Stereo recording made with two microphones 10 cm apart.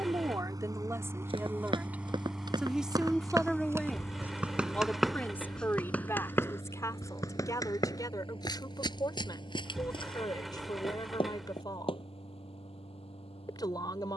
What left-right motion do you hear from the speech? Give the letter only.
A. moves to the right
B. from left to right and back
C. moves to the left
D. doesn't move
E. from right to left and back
C.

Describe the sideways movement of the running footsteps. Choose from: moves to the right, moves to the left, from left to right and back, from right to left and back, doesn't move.
moves to the left.